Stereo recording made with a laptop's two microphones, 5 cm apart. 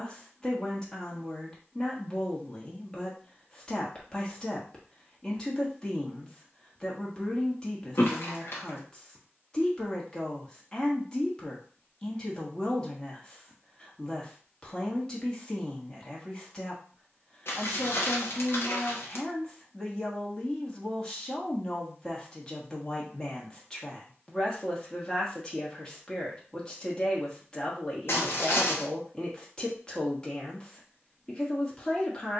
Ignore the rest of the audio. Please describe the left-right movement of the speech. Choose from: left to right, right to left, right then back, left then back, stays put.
stays put.